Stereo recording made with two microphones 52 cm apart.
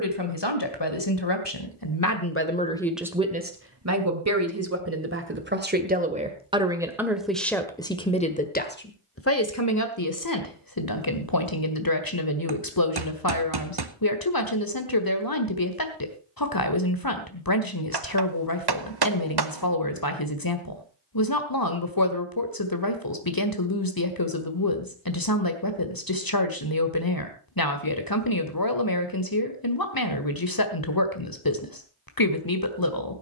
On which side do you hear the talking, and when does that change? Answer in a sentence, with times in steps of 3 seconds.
In this clip you hear the talking on the left from 0 s, on the right from 3 s, in the centre from 6 s and on the left from 9 s.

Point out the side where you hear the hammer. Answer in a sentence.
In this clip you hear the hammer on the right.